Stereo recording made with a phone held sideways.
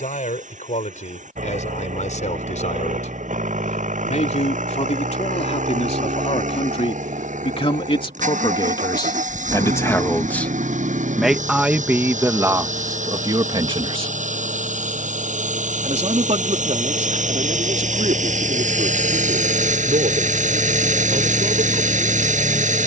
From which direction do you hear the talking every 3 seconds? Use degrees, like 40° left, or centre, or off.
70° left, 60° left, 40° left, 10° left, 30° right, 60° right, 70° right, 70° right.